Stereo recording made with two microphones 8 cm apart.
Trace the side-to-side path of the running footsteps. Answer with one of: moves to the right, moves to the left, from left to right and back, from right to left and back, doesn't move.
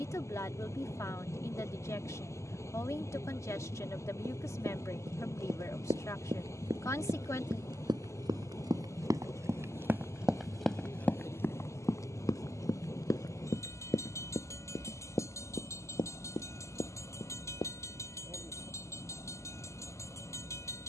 moves to the left.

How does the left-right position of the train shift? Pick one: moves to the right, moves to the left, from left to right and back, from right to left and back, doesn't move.
doesn't move.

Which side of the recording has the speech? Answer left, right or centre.
left.